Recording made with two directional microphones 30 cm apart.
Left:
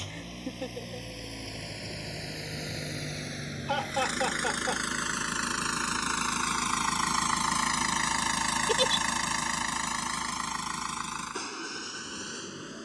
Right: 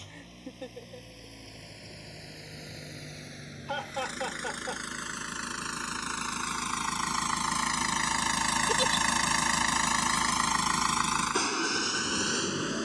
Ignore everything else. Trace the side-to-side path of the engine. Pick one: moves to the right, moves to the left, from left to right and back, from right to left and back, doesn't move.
moves to the right.